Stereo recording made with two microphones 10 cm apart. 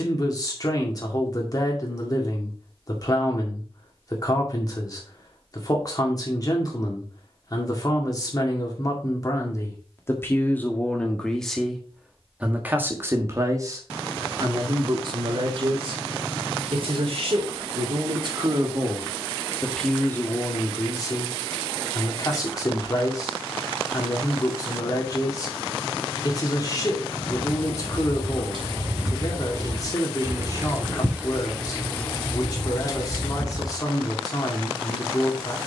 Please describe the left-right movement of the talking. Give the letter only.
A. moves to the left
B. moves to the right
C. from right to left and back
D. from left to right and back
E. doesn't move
D.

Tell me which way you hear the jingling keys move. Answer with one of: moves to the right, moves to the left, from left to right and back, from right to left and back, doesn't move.
moves to the left.